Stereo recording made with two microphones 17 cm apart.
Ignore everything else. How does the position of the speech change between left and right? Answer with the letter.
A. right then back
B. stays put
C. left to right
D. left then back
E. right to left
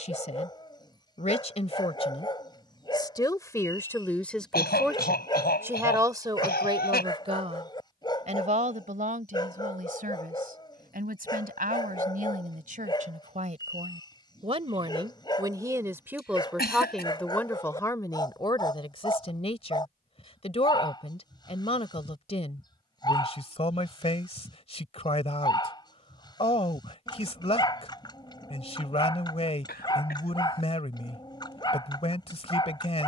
A.